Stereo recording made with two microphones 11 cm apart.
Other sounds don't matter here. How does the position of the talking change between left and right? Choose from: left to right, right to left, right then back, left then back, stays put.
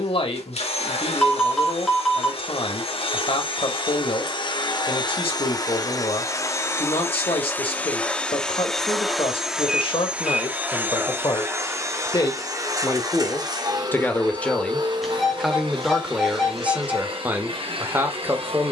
left to right.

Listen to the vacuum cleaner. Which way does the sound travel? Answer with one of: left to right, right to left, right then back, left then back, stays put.
left to right.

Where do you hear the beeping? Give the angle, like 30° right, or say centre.
centre.